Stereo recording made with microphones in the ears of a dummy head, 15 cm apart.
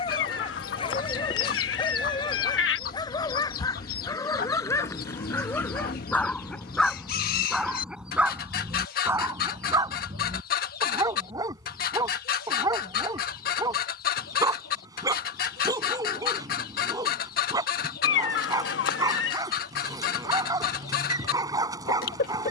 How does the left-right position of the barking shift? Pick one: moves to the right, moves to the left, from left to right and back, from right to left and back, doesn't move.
moves to the right.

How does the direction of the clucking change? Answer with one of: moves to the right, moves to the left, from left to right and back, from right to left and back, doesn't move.
doesn't move.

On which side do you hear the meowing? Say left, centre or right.
left.